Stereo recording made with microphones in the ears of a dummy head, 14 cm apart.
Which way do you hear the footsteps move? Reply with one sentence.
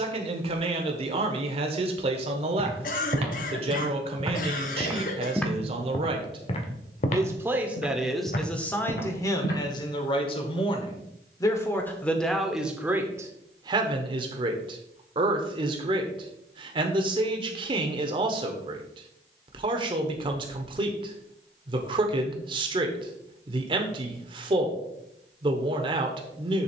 You can hear the footsteps move from right to left.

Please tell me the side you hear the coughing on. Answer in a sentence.
You can hear the coughing on the left.